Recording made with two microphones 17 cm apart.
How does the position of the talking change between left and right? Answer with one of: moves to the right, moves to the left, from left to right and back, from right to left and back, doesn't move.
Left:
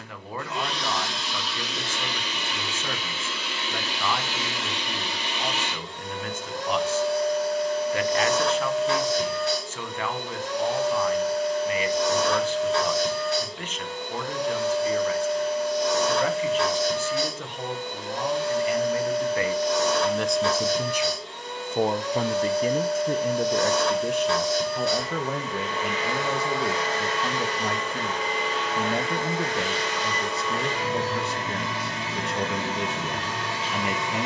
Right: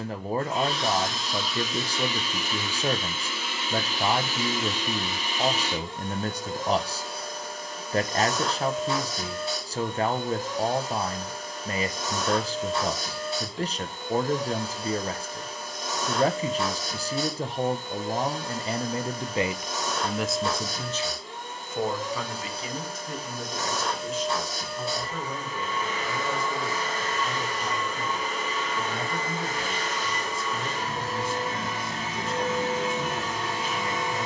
moves to the left.